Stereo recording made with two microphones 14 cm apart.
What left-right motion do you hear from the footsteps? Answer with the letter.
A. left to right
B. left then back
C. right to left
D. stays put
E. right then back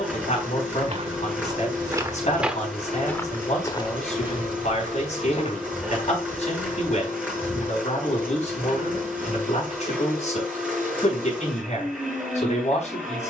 C.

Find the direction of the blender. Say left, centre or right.
centre.